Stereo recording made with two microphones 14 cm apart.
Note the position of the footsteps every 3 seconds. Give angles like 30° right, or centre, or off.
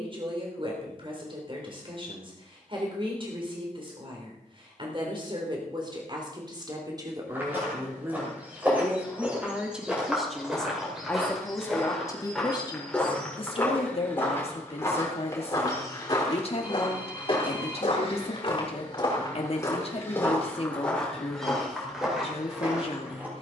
off, off, 10° right, centre, 10° left, 30° left, 30° left, centre.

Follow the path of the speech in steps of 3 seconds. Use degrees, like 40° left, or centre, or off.
40° right, 40° right, 30° right, centre, 40° left, 50° left, 50° left, 50° left.